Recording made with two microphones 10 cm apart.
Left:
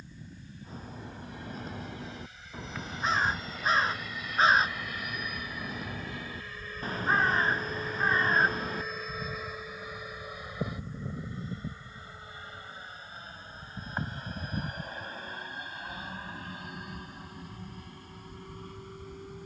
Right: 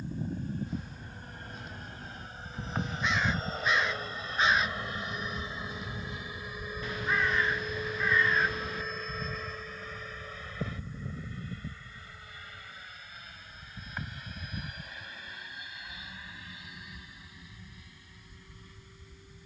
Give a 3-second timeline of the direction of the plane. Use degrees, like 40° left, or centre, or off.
50° right, 30° right, 10° right, 10° left, 30° left, 40° left, 50° left.